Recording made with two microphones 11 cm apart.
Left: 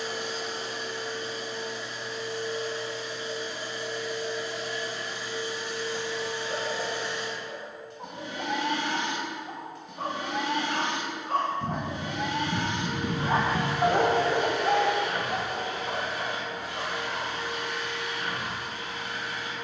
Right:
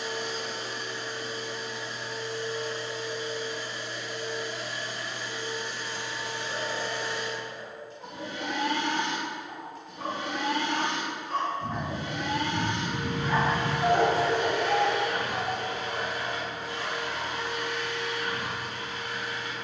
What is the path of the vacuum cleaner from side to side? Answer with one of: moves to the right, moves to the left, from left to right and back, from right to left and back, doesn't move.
doesn't move.